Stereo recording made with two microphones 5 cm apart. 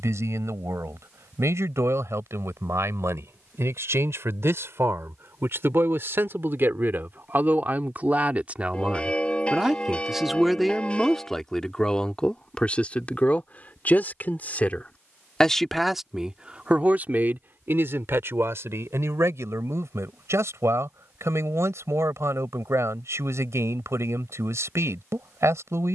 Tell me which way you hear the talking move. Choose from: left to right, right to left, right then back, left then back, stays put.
left then back.